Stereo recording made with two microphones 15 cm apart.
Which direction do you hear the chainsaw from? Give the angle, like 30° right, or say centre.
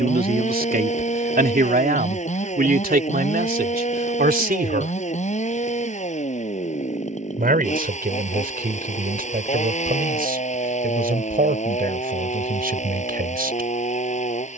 50° left.